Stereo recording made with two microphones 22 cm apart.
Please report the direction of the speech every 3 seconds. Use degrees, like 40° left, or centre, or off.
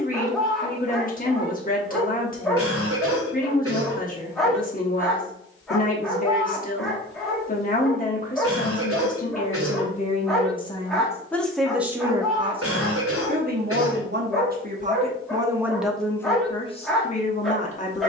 40° left, 40° left, 40° left, 20° left, 40° right, 10° left.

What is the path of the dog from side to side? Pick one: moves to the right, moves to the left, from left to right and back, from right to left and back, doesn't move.
doesn't move.